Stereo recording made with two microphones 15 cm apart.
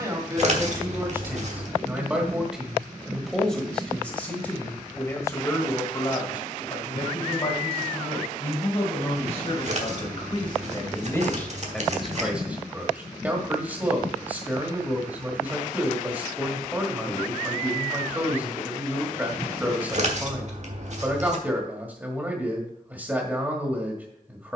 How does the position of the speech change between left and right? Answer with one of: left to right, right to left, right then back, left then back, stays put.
left then back.